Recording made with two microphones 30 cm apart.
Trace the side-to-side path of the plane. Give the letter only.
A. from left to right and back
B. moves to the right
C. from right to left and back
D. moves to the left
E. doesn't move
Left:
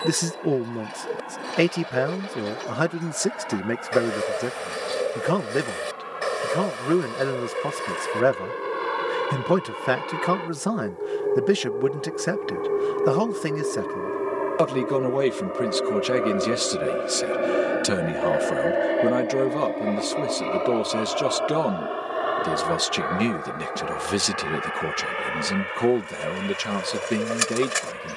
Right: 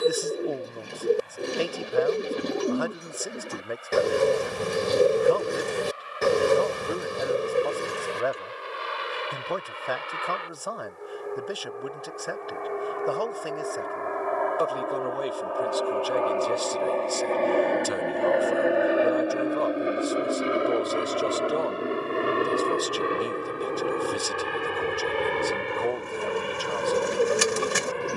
B.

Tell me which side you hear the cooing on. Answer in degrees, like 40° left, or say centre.
50° right.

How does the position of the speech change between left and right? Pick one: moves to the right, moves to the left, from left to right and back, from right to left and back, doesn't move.
doesn't move.